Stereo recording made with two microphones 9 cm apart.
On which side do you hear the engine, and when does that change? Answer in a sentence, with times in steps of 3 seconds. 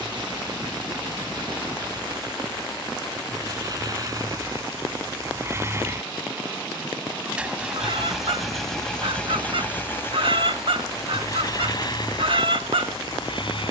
In this clip you hear the engine on the right from 0 s, in the centre from 6 s and on the left from 9 s.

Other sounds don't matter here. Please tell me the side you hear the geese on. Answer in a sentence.
In this clip you hear the geese on the right.